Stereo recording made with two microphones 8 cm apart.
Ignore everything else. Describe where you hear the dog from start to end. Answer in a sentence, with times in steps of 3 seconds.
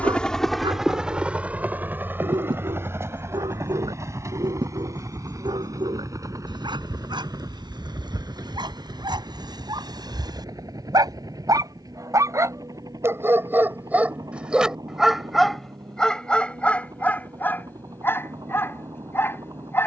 You can hear the dog on the right from 0 s, in the centre from 15 s and on the left from 18 s.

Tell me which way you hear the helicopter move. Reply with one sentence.
In this clip you hear the helicopter move to the right.